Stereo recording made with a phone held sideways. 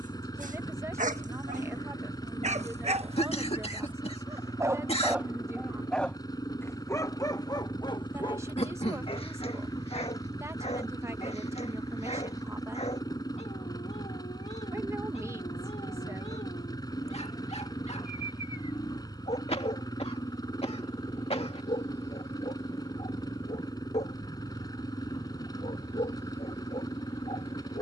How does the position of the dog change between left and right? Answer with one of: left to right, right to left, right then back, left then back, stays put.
right to left.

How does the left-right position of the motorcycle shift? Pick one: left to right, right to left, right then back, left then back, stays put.
stays put.